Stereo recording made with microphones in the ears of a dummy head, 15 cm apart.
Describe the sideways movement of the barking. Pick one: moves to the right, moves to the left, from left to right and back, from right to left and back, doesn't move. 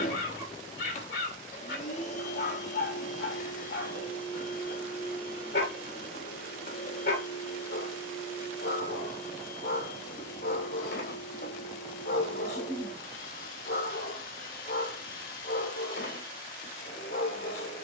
doesn't move.